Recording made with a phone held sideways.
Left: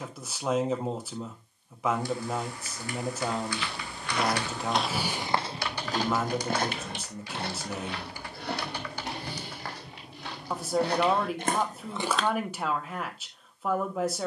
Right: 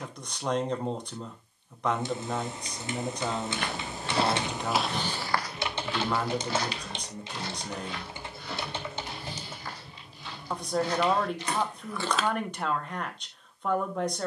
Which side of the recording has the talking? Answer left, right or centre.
centre.